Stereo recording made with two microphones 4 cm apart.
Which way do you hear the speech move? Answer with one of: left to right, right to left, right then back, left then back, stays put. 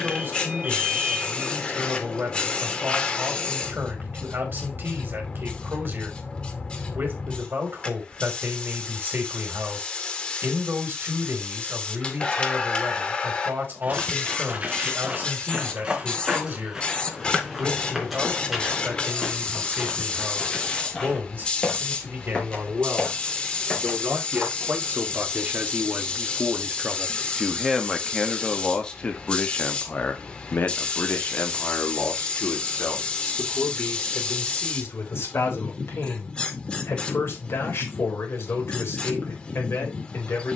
right to left.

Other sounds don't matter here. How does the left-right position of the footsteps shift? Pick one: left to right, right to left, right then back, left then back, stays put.
right to left.